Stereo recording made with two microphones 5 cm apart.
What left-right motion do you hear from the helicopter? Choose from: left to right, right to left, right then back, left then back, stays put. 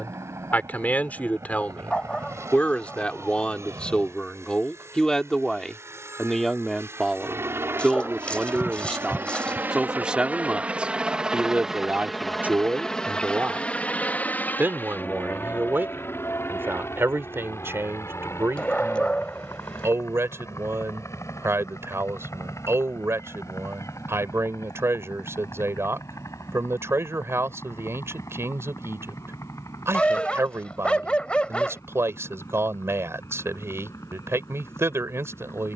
right to left.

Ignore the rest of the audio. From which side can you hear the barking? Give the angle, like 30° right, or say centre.
20° left.